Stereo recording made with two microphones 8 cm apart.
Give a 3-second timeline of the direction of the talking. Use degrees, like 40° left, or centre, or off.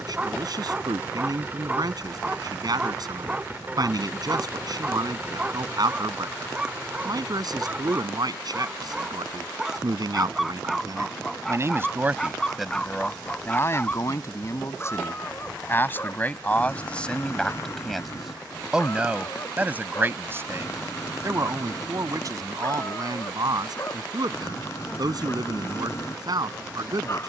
60° right, 60° right, 60° right, 50° right, 20° left, 20° left, 20° right, 50° right, 60° right.